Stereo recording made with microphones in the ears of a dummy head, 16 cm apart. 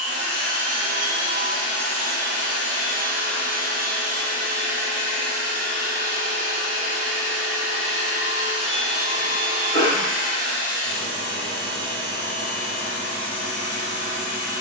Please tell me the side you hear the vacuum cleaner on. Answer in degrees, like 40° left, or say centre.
40° right.